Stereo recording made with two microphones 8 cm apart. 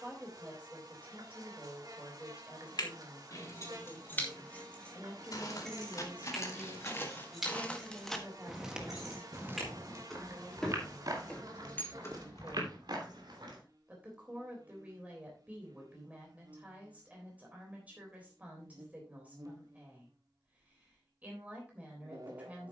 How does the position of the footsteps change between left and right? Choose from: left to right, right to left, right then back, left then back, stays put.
left to right.